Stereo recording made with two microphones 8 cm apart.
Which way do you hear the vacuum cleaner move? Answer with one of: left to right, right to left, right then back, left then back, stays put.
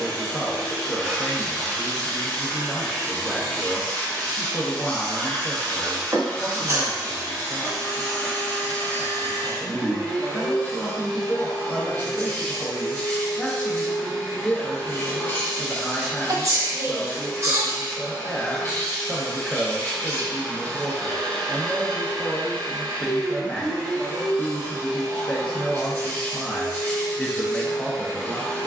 stays put.